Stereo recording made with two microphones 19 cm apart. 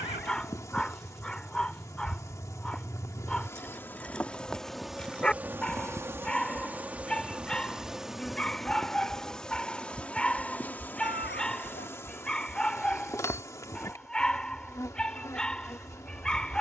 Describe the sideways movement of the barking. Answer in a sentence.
In this clip you hear the barking stay put.